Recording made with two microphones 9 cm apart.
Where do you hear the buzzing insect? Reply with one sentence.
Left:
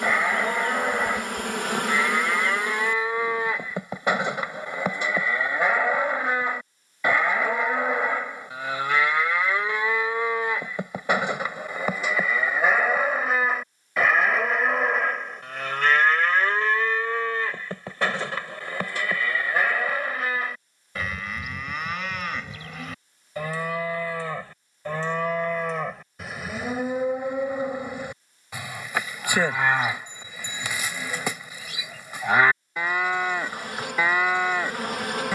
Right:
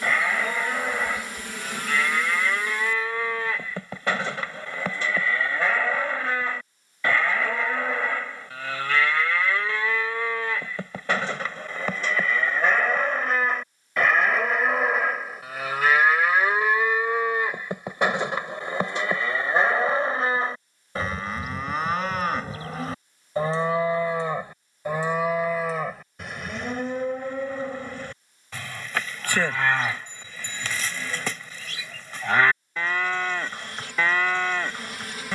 You can hear the buzzing insect on the left.